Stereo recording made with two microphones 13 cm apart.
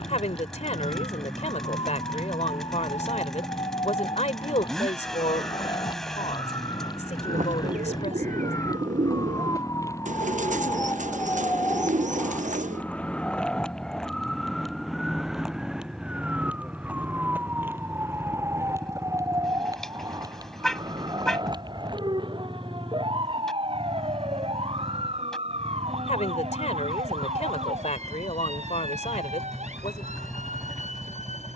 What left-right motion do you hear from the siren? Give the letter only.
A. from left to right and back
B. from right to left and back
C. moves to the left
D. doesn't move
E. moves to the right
E.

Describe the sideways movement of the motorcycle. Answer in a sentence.
You can hear the motorcycle stay in one place.